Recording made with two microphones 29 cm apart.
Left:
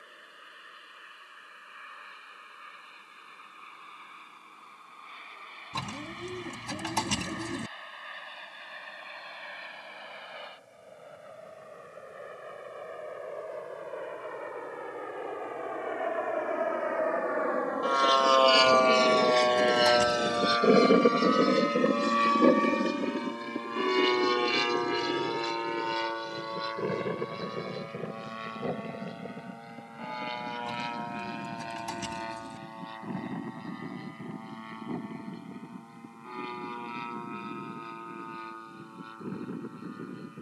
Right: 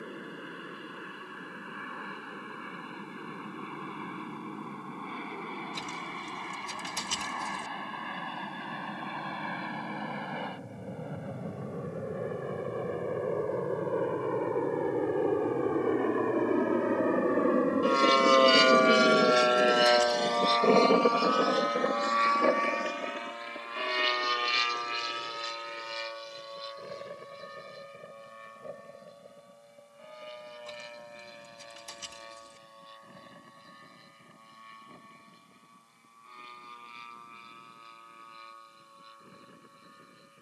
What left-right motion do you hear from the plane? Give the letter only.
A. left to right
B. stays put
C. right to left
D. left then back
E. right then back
C.